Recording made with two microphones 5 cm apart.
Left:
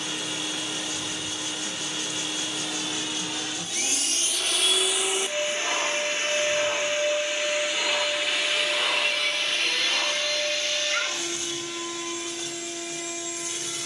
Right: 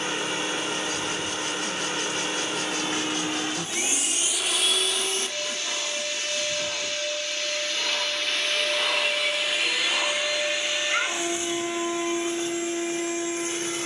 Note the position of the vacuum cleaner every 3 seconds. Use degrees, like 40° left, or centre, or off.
40° right, centre, 20° left, 10° right, 30° right.